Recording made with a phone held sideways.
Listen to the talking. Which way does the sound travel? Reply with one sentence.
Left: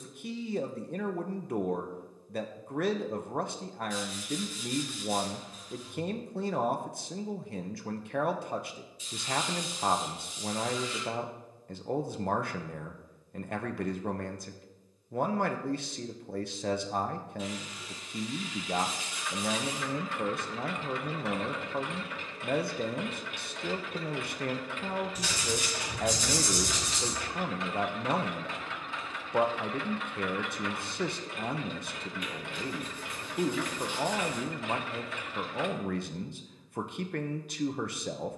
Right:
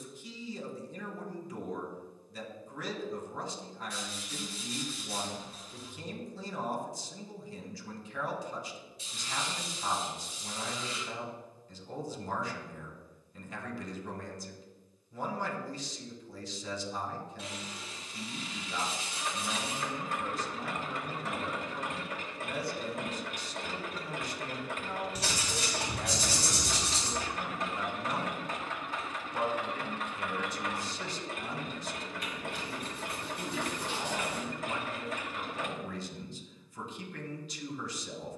In this clip you hear the talking stay put.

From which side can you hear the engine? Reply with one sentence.
You can hear the engine on the right.